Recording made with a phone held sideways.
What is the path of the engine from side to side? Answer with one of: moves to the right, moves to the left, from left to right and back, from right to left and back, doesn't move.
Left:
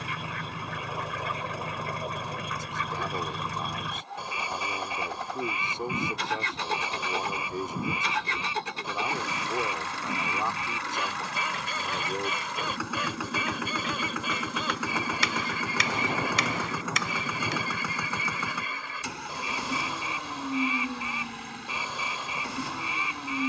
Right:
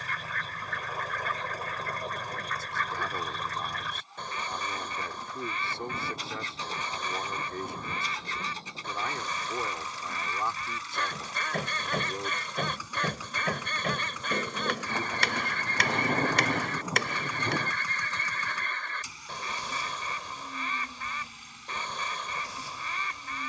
doesn't move.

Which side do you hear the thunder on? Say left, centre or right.
centre.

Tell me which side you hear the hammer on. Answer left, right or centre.
right.